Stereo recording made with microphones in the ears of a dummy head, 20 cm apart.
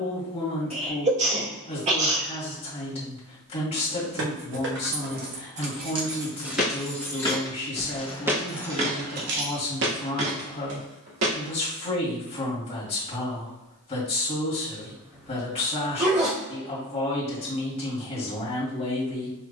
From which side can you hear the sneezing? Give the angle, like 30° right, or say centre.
30° right.